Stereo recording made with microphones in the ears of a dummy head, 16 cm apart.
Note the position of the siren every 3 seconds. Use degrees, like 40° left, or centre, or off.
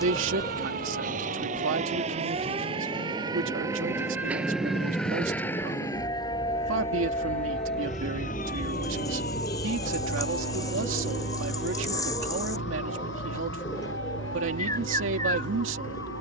40° right, centre, 30° left, 60° left, 70° left, 70° left.